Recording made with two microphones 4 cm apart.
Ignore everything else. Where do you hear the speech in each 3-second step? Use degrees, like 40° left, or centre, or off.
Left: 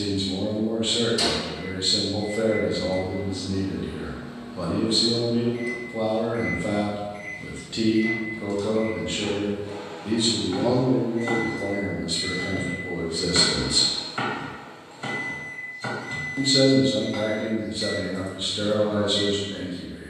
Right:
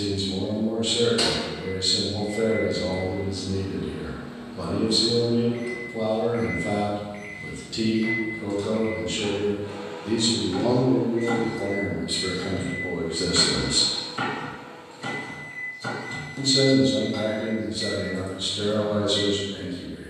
30° left, 30° left, 30° left, 10° left, 30° right, 30° left, 30° left.